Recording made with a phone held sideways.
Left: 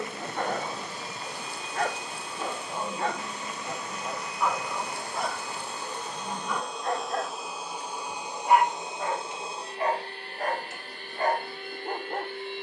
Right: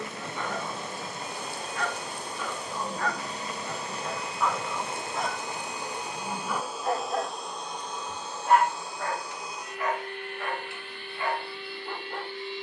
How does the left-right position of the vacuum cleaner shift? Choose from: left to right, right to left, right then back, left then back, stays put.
right to left.